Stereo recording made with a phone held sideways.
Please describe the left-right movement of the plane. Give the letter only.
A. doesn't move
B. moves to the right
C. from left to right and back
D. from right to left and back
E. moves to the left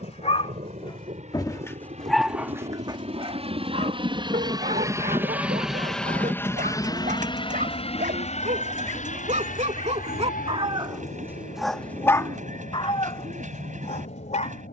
E.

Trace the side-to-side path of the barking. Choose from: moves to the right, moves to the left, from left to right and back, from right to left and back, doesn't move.
from left to right and back.